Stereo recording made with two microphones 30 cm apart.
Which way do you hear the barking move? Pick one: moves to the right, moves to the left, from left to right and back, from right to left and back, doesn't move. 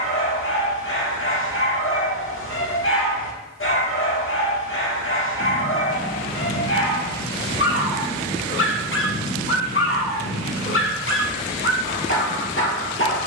doesn't move.